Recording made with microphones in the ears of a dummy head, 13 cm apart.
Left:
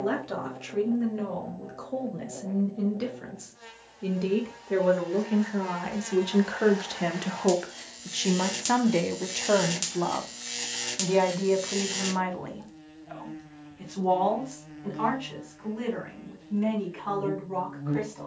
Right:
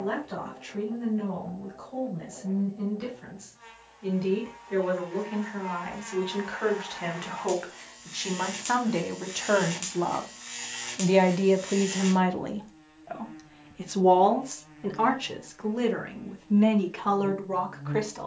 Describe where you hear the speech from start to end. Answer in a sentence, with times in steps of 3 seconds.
In this clip you hear the speech on the left from 0 s, in the centre from 9 s and on the right from 12 s.